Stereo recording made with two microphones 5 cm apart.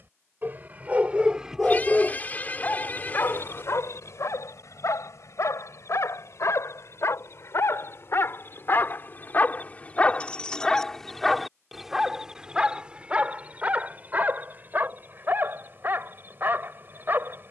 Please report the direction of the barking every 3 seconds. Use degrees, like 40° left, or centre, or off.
10° right, 70° left, 60° left, 20° left, 30° right, 40° right.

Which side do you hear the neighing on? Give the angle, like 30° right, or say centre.
40° left.